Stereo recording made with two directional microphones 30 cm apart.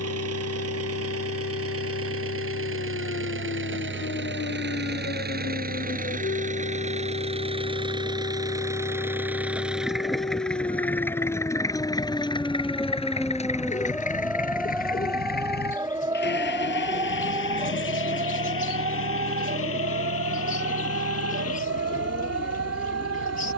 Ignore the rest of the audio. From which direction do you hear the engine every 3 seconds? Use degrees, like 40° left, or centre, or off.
50° right, 40° right, 20° right, centre, 20° left, 40° left, 50° left, 50° left.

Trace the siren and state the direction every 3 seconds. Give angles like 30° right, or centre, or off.
50° left, 40° left, 30° left, 20° left, centre, 20° right, 30° right, 40° right.